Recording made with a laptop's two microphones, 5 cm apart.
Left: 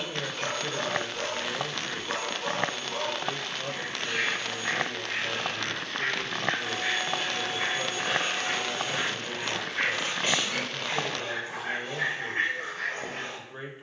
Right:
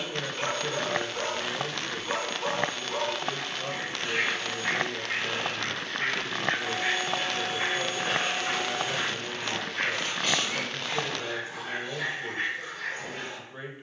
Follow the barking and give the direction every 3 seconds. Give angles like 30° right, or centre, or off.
20° right, 20° right, 10° right, 20° left, 40° left.